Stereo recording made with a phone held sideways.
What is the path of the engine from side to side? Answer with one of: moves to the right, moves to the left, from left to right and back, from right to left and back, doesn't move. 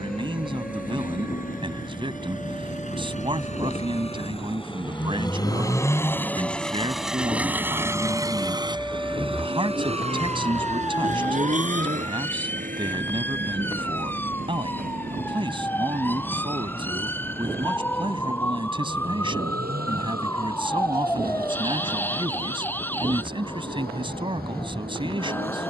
moves to the right.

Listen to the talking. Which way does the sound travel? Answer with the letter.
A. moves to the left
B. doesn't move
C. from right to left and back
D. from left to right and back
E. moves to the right
B.